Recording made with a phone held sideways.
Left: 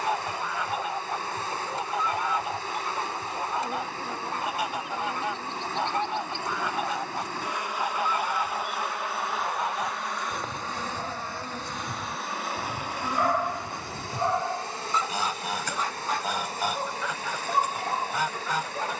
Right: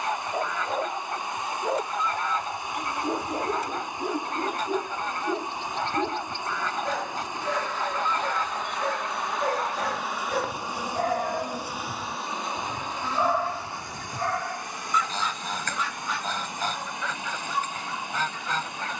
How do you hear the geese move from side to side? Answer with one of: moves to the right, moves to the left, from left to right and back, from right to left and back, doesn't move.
doesn't move.